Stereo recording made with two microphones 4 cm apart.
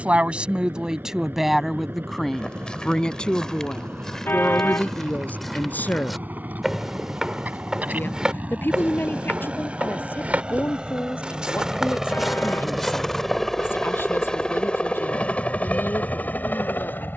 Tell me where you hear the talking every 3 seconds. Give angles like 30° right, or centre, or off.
10° right, 30° left, 50° left, 60° left, 60° left, 60° left.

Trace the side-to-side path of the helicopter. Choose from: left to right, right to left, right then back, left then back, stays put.
right to left.